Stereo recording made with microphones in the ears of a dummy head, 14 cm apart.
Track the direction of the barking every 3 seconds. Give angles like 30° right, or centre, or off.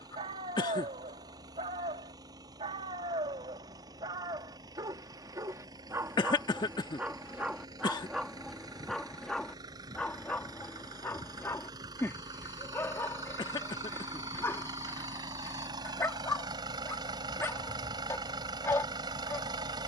30° right, 20° right, 10° right, 10° left, 10° left, 10° left, 10° left.